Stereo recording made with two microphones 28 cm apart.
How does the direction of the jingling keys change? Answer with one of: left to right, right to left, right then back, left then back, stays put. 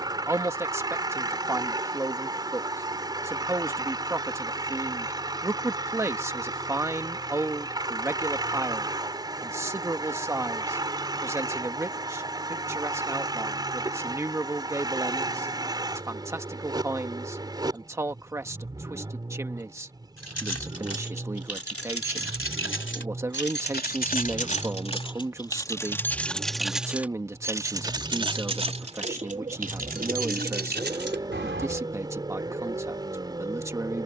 left to right.